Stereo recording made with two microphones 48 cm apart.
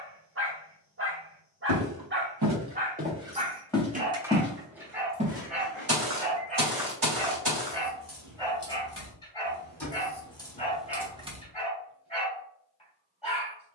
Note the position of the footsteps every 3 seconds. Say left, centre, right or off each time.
right, centre, right, off, off.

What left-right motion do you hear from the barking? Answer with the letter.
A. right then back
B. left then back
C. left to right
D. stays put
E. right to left
E.